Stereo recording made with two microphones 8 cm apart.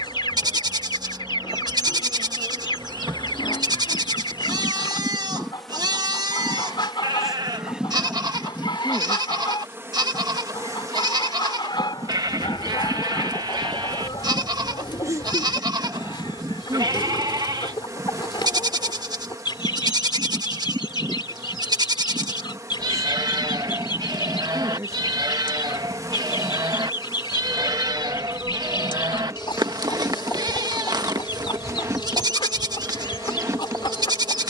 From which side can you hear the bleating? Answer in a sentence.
You can hear the bleating on the right.